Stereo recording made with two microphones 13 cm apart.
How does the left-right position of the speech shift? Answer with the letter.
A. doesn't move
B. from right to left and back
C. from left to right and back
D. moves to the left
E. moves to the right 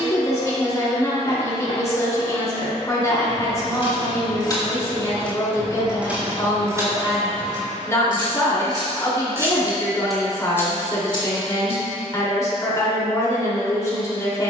A.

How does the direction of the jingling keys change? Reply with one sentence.
In this clip you hear the jingling keys go right and come back.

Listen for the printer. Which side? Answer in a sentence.
You can hear the printer on the left.